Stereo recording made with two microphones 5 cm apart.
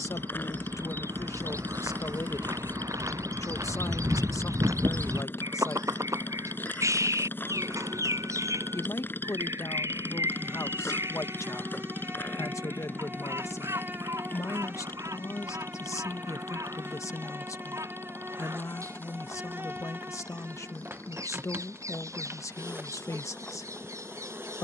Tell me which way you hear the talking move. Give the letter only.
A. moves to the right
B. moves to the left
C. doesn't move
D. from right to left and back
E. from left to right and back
C.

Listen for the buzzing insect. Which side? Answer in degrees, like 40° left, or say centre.
40° right.